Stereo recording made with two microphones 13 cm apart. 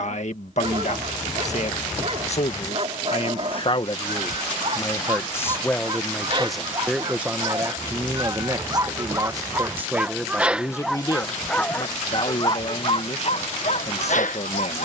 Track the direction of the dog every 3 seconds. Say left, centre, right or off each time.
right, right, right, centre, left.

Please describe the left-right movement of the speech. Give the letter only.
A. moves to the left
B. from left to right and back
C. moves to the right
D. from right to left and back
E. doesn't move
B.